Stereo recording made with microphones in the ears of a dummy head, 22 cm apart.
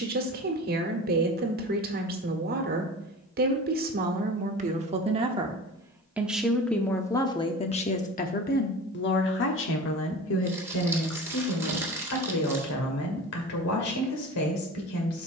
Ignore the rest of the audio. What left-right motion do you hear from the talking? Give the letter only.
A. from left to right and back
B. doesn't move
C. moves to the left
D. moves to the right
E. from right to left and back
C.